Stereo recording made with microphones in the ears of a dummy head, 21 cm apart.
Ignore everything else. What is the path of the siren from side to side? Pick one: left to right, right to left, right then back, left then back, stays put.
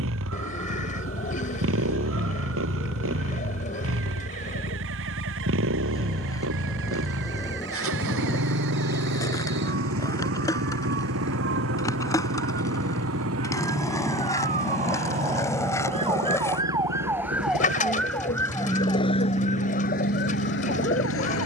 right to left.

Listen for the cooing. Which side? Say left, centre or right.
left.